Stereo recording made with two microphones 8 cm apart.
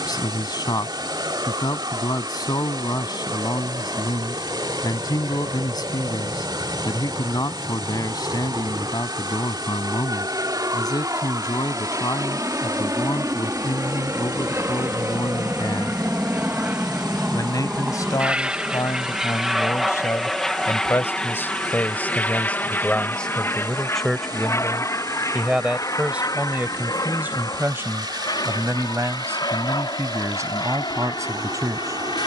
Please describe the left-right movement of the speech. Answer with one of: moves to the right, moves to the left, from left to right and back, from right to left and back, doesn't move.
moves to the right.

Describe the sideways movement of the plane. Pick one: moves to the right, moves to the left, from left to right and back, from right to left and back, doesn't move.
moves to the left.